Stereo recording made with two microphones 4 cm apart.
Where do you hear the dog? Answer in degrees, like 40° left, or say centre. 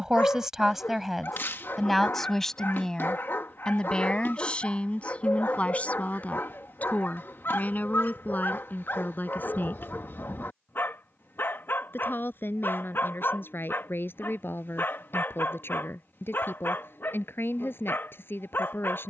50° left.